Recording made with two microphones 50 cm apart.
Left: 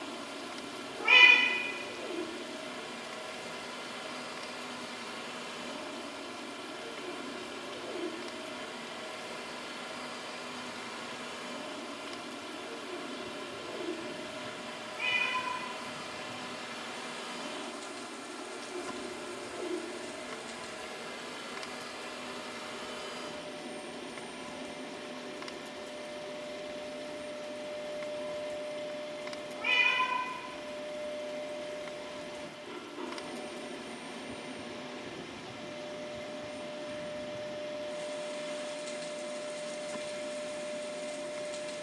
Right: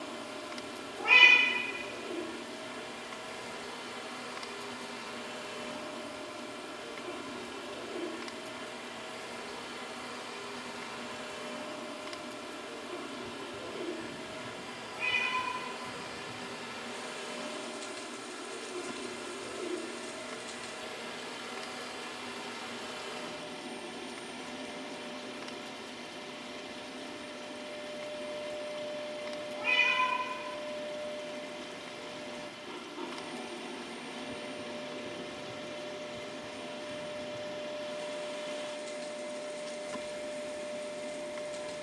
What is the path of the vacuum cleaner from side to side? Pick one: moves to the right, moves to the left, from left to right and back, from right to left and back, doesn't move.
from left to right and back.